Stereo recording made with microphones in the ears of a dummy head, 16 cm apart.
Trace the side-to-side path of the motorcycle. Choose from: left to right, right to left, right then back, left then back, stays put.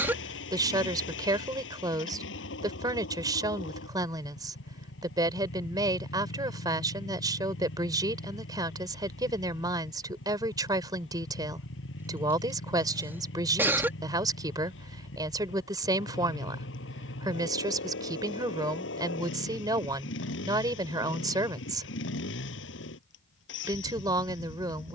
stays put.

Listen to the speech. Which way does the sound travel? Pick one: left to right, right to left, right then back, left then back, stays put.
stays put.